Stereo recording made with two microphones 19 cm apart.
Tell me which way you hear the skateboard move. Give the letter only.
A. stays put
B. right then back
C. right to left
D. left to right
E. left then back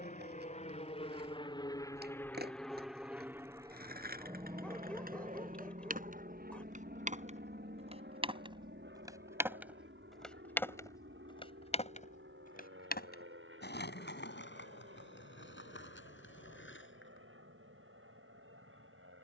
C.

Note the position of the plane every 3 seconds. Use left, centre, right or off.
left, right, right, right, right, right, right.